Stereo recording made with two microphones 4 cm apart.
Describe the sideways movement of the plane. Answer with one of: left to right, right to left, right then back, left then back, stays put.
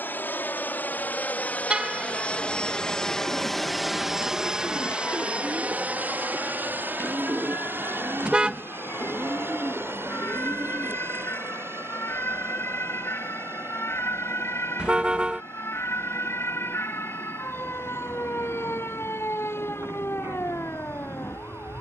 left to right.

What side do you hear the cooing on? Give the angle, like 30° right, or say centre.
70° right.